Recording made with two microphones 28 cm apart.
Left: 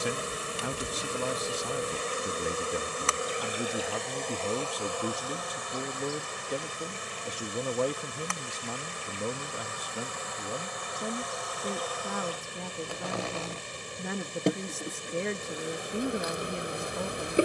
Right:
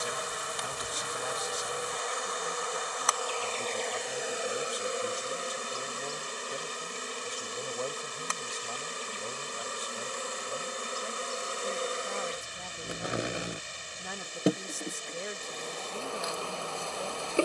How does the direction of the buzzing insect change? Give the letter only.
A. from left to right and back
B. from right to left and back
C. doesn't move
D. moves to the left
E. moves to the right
A.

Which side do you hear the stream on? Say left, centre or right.
left.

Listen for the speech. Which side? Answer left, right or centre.
left.